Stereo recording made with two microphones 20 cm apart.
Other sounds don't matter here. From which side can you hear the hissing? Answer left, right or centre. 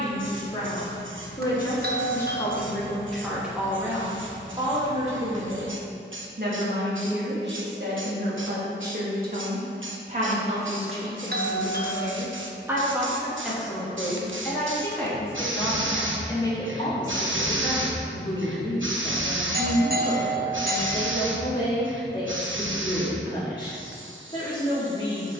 right.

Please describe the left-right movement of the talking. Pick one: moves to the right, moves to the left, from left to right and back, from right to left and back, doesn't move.
from left to right and back.